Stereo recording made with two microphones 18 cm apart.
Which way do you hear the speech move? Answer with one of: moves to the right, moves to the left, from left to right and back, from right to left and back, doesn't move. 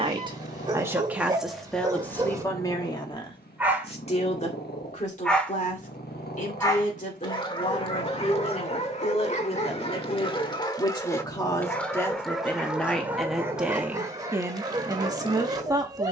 from right to left and back.